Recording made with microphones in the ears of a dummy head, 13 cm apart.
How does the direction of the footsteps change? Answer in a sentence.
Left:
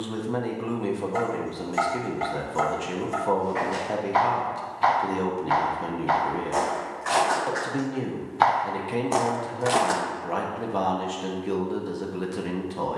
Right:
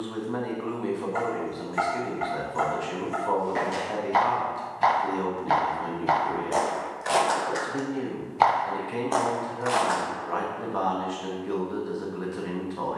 You can hear the footsteps go from the right side to the left.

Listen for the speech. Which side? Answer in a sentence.
You can hear the speech on the left.